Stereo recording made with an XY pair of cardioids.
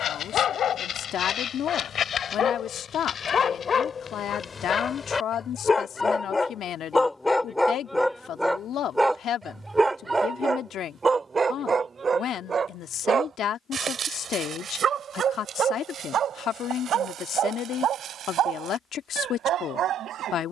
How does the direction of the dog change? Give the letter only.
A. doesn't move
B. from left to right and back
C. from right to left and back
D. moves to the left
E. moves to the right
E.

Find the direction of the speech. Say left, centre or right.
left.